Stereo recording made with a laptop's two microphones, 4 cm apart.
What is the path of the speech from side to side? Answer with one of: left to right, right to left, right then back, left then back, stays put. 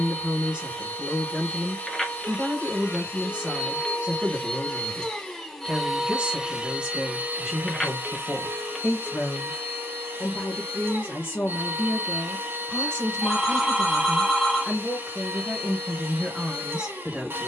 left then back.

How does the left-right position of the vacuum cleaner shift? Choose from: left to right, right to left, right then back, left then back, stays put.
left to right.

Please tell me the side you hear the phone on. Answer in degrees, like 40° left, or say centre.
10° left.